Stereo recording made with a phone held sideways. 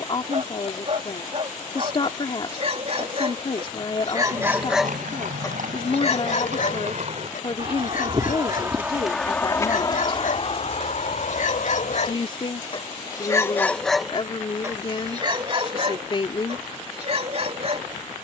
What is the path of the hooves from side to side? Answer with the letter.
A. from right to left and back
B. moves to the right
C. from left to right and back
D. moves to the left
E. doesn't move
D.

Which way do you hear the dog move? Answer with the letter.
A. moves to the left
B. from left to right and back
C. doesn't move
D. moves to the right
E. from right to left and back
E.